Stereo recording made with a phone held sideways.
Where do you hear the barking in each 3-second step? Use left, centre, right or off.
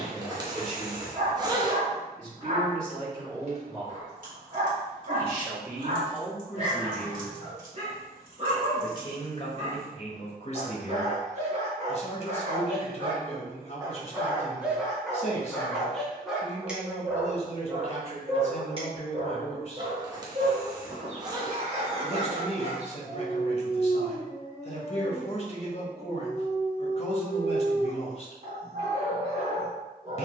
right, right, right, right, right, centre, right, right, right, right.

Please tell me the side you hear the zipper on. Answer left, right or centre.
right.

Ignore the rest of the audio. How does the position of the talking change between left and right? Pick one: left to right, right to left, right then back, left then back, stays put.
right to left.